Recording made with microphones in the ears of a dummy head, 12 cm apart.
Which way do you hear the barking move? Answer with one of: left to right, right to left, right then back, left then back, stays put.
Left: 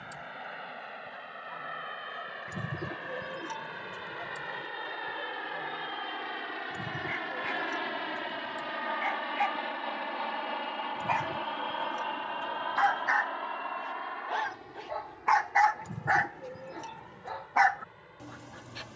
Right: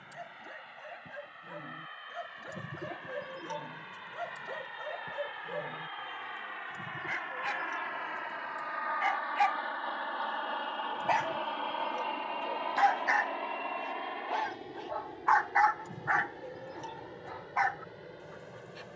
right to left.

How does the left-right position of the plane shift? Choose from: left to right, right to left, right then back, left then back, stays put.
left to right.